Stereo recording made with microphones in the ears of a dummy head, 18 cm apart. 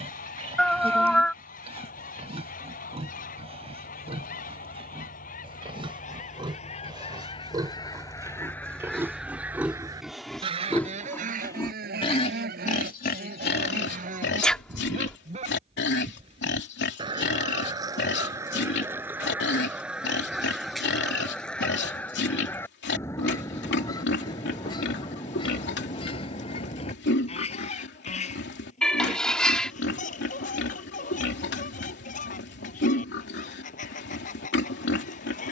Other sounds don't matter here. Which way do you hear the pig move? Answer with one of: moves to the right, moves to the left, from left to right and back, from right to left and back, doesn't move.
moves to the left.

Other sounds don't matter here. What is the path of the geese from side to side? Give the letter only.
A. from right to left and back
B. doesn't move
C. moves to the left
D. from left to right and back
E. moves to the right
D.